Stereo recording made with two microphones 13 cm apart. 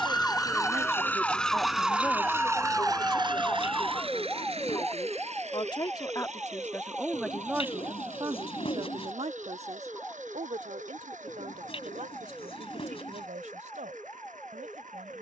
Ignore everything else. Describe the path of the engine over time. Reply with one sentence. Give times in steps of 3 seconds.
In this clip you hear the engine in the centre from 0 s and on the right from 3 s.